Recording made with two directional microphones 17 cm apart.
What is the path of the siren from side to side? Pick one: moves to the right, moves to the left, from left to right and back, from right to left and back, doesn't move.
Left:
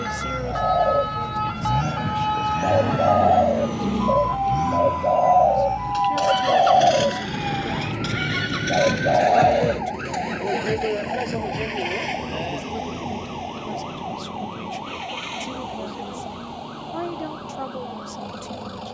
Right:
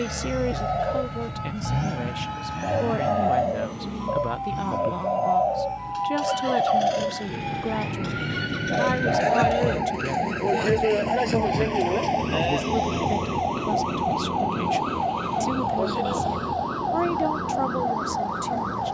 moves to the right.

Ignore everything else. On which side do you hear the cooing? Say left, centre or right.
left.